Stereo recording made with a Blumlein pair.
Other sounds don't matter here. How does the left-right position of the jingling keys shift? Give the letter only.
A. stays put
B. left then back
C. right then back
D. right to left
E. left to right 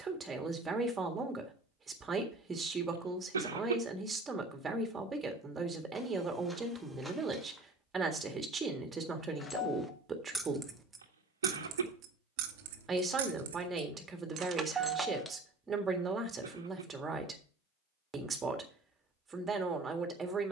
C.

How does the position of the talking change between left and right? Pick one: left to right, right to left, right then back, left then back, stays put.
stays put.